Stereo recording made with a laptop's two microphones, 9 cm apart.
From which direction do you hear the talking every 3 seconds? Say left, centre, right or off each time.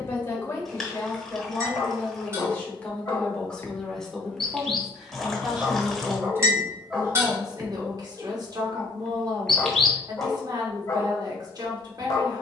left, centre, right, right.